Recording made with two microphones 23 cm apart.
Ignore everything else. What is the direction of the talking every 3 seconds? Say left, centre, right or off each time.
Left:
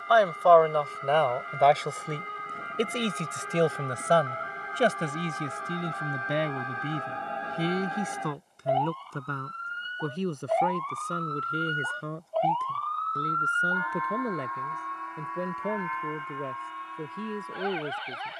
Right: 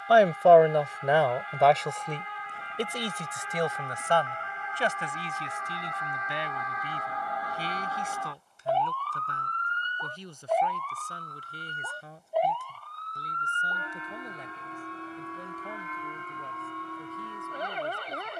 centre, left, left, left, left, left.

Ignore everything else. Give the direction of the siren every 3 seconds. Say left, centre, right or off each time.
left, left, left, centre, right, right.